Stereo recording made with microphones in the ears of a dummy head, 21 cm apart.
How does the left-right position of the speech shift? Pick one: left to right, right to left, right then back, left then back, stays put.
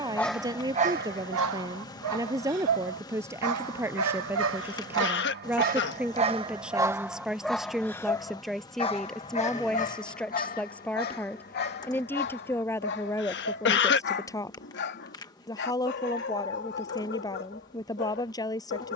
right to left.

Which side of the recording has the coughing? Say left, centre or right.
left.